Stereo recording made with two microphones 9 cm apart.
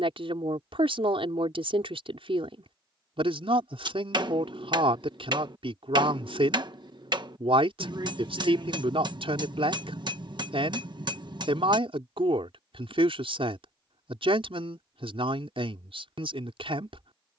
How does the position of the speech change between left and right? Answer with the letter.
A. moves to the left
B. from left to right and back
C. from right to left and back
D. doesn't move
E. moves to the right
D.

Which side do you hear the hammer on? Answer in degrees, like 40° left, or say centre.
60° right.